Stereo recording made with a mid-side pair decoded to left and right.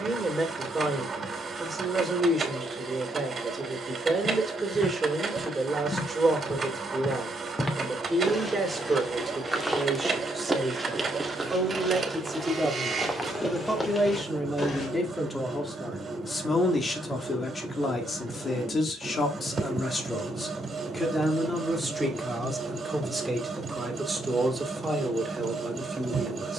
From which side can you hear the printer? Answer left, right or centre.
right.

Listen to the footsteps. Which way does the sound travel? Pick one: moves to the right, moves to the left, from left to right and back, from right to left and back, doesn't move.
from left to right and back.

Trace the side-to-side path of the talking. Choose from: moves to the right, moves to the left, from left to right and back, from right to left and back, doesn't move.
from right to left and back.